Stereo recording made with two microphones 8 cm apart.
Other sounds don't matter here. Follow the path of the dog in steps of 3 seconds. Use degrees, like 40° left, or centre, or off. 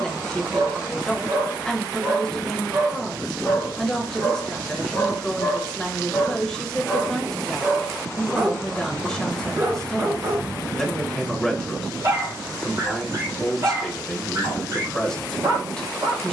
40° right, 20° left, 10° right, 30° right, 40° right, 40° right.